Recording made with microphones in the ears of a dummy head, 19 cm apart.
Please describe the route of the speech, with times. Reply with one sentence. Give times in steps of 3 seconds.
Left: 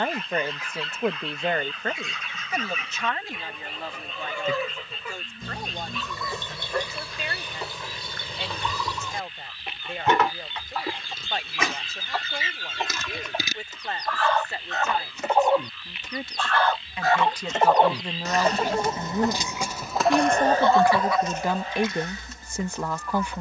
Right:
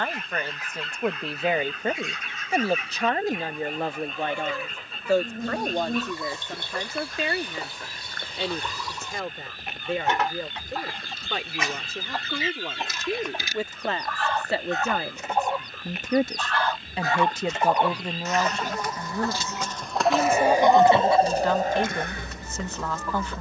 You can hear the speech in the centre from 0 s, on the right from 3 s and in the centre from 18 s.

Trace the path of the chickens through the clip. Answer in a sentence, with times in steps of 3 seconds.
In this clip you hear the chickens on the left from 0 s, in the centre from 18 s and on the right from 21 s.